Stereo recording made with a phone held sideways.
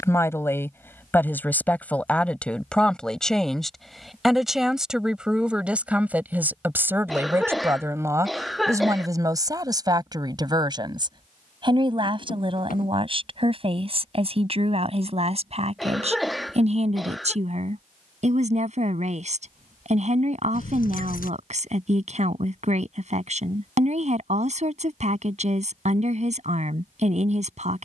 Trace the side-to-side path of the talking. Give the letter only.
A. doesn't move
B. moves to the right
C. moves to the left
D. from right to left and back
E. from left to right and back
B.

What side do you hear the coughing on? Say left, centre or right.
centre.